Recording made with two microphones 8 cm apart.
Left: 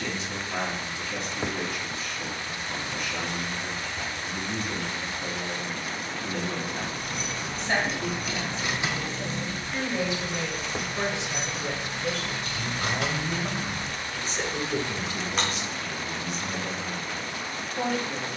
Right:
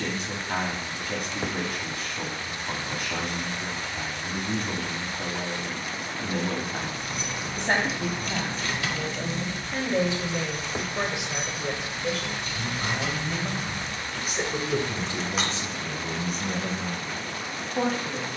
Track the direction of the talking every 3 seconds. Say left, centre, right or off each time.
right, right, right, right, centre, right.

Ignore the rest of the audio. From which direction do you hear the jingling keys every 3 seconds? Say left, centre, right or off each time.
off, off, centre, left, left, centre.